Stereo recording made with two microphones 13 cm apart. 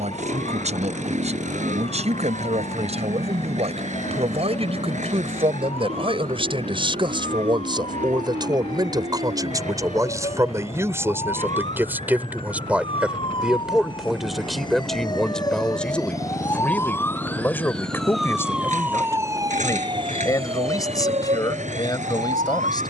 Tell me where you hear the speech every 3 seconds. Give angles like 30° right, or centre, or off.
60° right, 50° right, 40° right, 20° right, centre, 10° left, 20° left, 30° left.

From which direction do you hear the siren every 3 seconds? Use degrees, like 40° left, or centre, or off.
60° left, 60° left, 50° left, 50° left, 40° left, 20° left, 30° right, 70° right.